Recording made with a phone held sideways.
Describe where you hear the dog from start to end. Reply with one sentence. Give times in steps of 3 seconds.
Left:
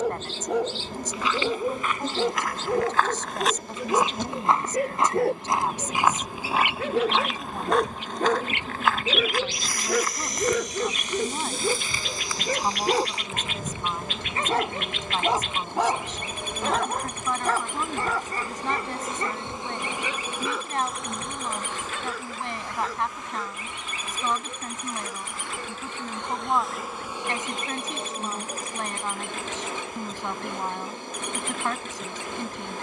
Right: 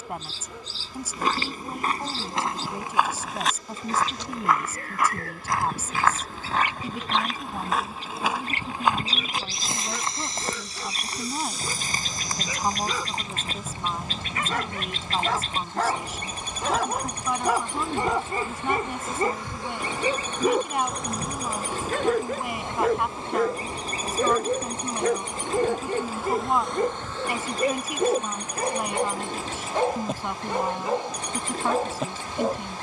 In this clip you hear the dog on the left from 0 s, in the centre from 15 s and on the right from 18 s.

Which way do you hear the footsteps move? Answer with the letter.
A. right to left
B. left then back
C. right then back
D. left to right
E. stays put
B.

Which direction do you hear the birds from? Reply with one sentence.
You can hear the birds on the right.